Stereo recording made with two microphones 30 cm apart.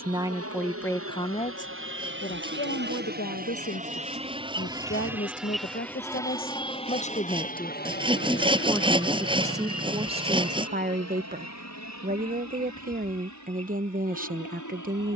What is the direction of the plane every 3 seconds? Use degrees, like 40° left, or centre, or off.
50° right, 20° right, 30° left, 50° left, 60° left.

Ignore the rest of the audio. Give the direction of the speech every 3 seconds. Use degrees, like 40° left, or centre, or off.
20° left, 40° left, 20° left, 20° right, 30° right.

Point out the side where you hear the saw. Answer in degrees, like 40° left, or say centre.
20° right.